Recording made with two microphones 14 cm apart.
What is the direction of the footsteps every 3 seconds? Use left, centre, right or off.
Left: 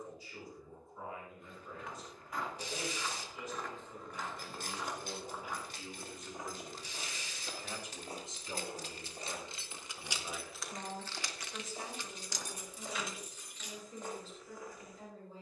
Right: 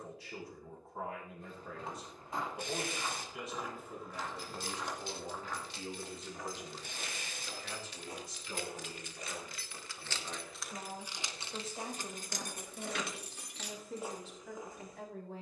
right, centre, left, left, centre.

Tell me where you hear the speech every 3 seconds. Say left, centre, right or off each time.
right, right, centre, centre, right.